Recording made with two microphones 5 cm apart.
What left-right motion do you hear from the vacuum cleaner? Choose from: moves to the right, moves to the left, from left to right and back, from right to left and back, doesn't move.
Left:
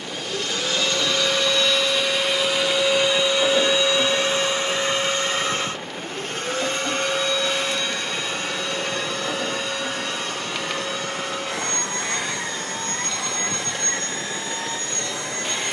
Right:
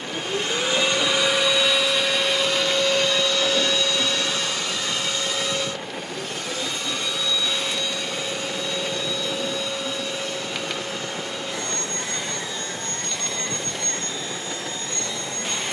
moves to the left.